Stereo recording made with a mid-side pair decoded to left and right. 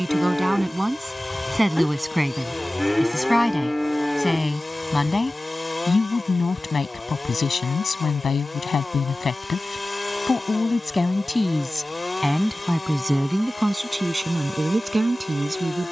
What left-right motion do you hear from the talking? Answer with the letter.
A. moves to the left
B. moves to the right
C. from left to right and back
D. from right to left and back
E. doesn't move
D.